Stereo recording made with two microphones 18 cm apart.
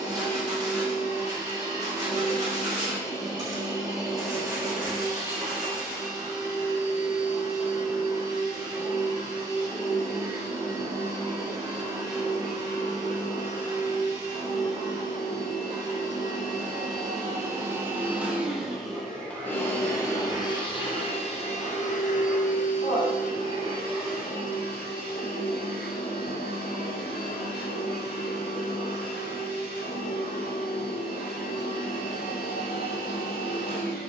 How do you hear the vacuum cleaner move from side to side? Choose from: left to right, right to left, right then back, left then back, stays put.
right to left.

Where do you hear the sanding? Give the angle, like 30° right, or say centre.
20° right.